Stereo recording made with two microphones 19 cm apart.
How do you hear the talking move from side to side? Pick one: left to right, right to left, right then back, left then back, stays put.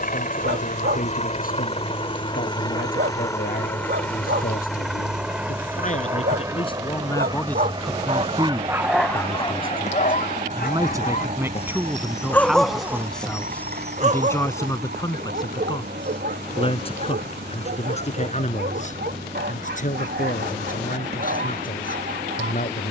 right then back.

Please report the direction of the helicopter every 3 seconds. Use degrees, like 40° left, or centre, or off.
30° left, centre, 20° right, 40° right, 40° right, 50° right, 50° right, 60° right.